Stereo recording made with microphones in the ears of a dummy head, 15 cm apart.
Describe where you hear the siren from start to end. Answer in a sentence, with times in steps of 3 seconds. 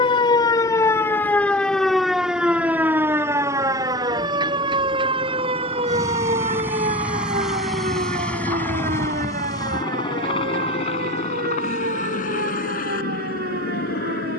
You can hear the siren in the centre from 0 s and on the right from 3 s.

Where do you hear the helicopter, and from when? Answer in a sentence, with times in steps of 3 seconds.
In this clip you hear the helicopter on the right from 0 s, in the centre from 6 s and on the left from 9 s.